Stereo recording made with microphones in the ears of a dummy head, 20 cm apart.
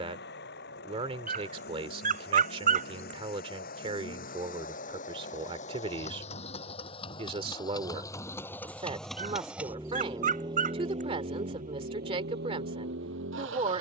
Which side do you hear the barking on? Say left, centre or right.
right.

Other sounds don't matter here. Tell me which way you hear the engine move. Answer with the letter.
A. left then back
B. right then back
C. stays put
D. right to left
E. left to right
E.